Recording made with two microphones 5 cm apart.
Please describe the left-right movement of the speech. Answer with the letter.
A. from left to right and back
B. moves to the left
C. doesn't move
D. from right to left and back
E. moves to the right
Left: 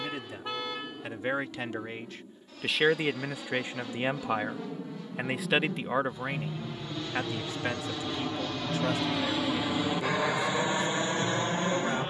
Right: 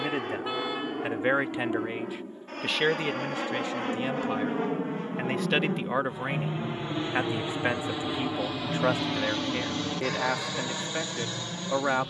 D.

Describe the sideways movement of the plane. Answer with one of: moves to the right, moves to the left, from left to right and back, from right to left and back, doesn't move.
moves to the left.